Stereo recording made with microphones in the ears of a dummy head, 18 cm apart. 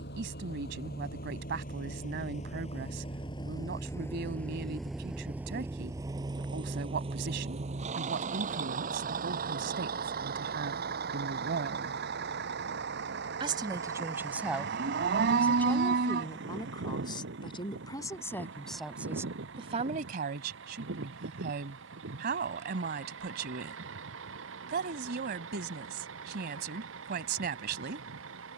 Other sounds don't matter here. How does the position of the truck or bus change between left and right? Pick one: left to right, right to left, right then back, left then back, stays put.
left to right.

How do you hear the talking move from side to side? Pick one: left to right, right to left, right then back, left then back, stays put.
left then back.